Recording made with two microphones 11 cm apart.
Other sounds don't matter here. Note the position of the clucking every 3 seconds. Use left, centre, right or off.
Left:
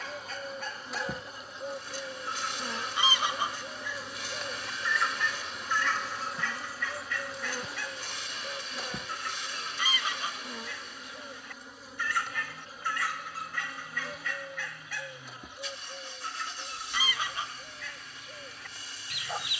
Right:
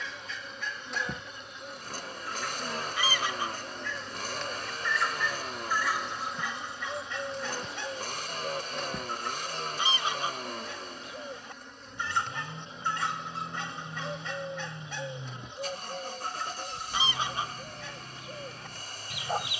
left, centre, right, right, right, right, right.